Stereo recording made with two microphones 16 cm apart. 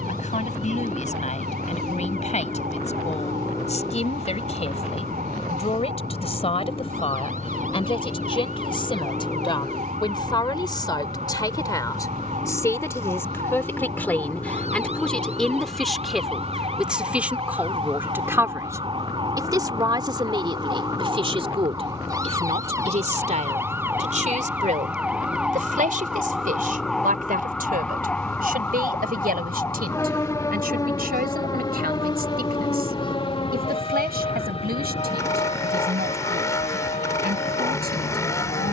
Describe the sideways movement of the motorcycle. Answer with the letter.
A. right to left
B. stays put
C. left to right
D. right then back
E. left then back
B.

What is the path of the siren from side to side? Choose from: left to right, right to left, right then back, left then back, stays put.
right to left.